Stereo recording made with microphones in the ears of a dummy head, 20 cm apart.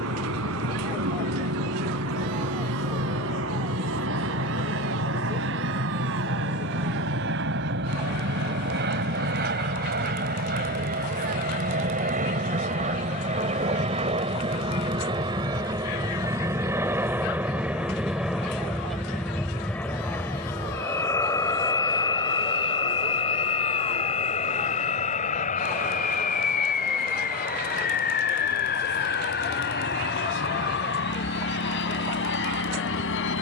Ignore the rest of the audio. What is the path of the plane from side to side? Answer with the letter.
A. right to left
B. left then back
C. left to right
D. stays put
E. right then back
A.